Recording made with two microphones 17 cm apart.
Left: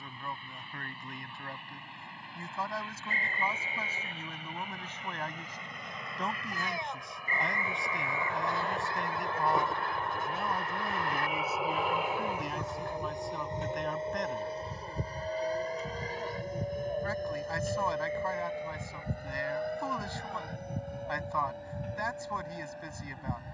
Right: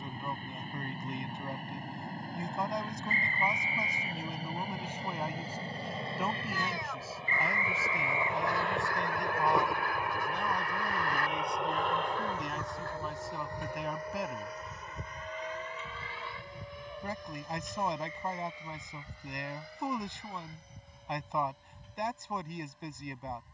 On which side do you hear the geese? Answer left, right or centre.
left.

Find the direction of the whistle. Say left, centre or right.
left.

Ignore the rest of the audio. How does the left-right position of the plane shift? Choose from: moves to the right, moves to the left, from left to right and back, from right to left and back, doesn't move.
moves to the left.